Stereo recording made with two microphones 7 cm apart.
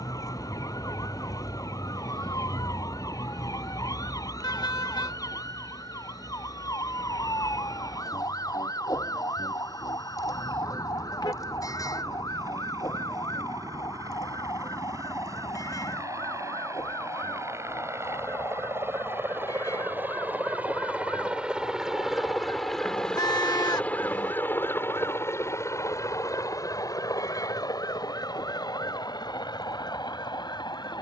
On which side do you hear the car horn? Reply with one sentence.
In this clip you hear the car horn on the left.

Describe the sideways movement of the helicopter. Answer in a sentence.
You can hear the helicopter travel towards the left.